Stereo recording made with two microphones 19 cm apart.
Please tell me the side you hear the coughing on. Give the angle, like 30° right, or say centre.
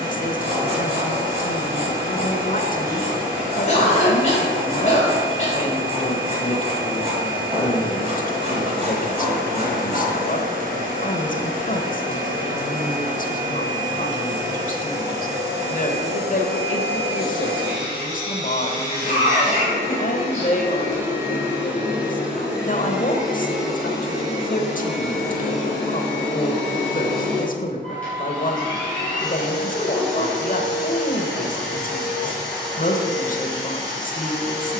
40° left.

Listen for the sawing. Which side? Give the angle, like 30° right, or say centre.
30° right.